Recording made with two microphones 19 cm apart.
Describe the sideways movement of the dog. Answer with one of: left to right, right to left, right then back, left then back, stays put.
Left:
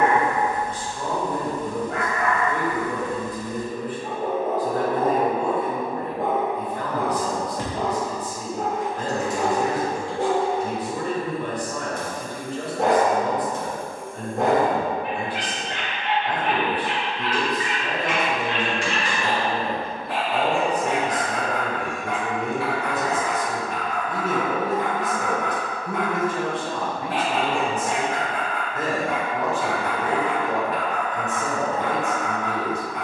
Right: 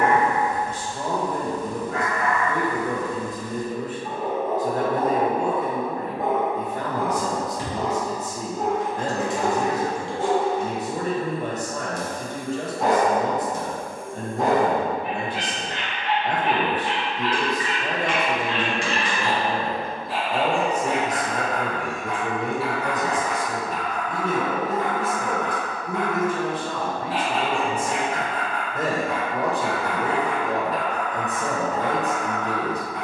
stays put.